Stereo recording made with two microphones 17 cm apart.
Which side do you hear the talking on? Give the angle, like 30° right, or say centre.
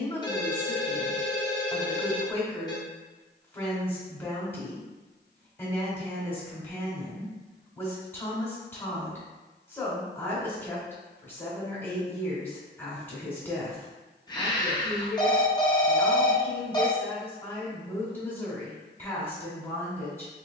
10° left.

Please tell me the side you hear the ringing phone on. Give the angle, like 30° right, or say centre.
20° left.